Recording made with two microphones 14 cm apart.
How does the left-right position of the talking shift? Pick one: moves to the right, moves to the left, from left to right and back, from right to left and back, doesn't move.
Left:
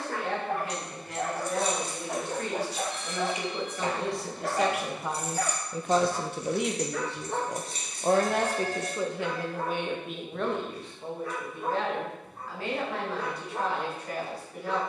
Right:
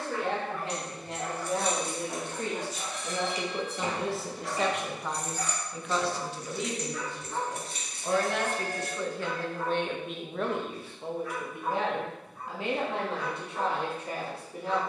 from right to left and back.